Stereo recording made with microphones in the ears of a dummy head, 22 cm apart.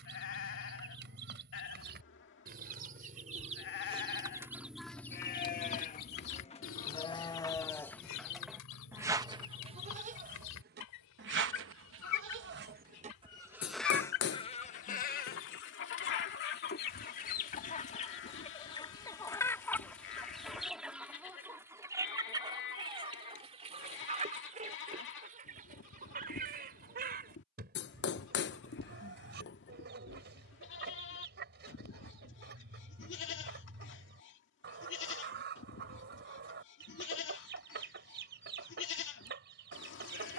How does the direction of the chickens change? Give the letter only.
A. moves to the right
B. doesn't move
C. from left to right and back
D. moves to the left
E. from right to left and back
E.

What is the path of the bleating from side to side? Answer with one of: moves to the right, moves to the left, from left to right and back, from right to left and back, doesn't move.
from left to right and back.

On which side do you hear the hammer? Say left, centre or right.
left.